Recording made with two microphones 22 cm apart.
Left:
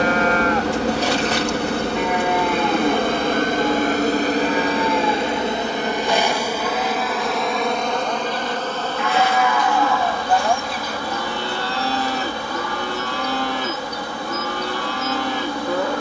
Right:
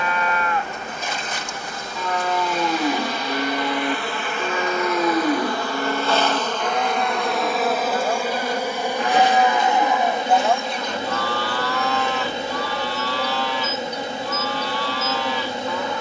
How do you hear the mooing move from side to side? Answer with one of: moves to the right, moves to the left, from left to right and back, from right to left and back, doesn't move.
from left to right and back.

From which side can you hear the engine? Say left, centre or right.
left.